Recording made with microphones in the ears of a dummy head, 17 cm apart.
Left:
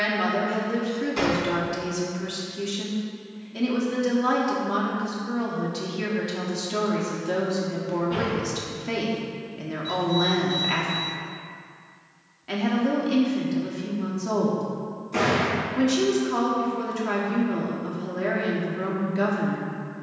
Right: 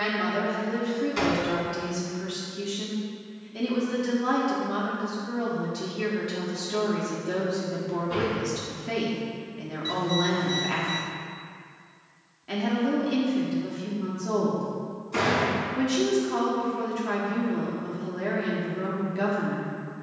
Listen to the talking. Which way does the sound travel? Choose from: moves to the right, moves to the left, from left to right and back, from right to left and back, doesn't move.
doesn't move.